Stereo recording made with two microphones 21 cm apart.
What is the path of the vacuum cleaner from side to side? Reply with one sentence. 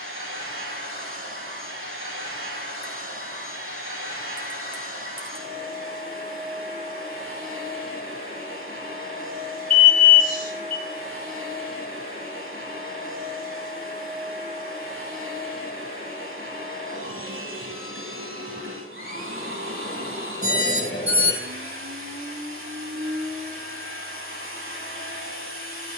You can hear the vacuum cleaner stay in one place.